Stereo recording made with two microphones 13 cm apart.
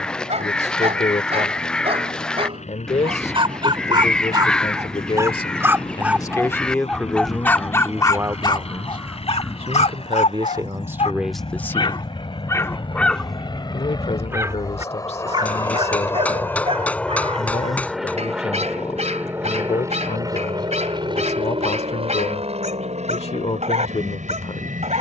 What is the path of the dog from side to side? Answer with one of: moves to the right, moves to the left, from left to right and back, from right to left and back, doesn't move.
from right to left and back.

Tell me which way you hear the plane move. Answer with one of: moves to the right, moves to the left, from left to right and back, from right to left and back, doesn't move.
moves to the right.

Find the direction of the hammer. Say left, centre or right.
centre.